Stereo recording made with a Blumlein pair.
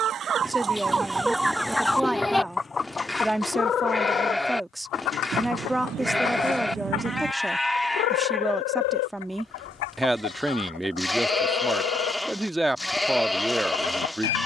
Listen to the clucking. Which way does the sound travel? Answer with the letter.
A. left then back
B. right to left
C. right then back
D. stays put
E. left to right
B.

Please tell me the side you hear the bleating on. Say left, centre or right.
centre.